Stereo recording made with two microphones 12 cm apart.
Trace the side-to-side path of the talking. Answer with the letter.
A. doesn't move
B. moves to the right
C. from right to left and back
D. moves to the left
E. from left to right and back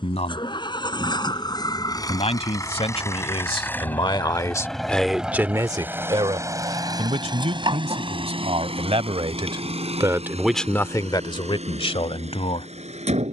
E.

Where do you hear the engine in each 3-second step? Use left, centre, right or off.
left, centre, right, right, right.